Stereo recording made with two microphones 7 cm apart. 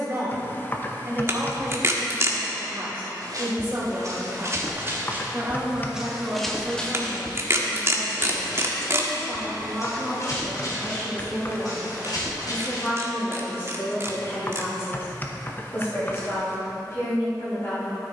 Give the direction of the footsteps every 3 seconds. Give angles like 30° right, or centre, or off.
off, 40° right, 20° left, 50° left, 60° left, off.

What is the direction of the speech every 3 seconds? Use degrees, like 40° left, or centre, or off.
30° right, 30° right, 10° right, 10° left, 30° left, 40° left.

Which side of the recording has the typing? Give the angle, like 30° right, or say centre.
30° left.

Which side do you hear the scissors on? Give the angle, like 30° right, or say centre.
40° right.